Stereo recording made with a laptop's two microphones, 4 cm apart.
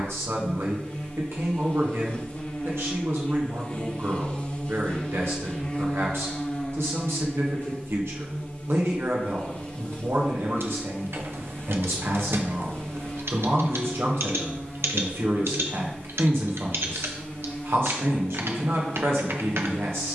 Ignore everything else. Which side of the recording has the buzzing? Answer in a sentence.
You can hear the buzzing on the left.